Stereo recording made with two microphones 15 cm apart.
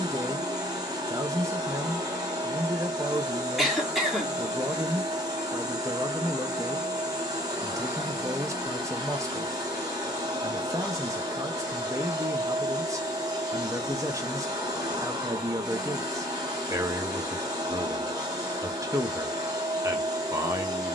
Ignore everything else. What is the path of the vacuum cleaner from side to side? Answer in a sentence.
In this clip you hear the vacuum cleaner stay put.